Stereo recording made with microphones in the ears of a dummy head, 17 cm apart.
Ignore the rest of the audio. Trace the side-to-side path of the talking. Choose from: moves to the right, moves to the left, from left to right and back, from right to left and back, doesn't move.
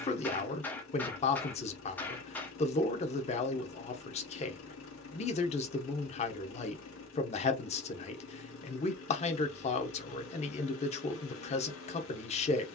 doesn't move.